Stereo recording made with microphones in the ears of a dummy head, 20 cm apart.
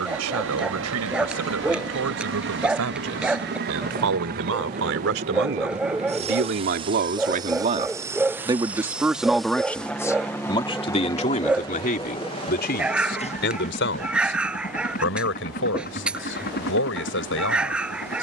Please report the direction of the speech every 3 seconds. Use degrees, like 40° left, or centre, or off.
70° right, 60° right, 30° right, 20° left, 50° left, 60° left.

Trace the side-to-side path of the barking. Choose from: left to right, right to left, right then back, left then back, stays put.
stays put.